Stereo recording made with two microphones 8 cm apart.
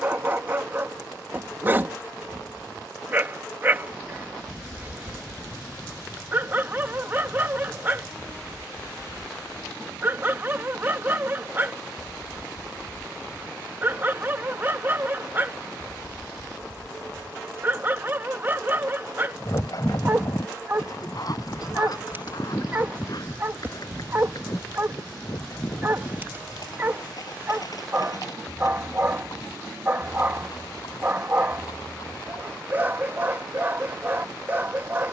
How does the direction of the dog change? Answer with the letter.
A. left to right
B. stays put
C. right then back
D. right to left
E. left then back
B.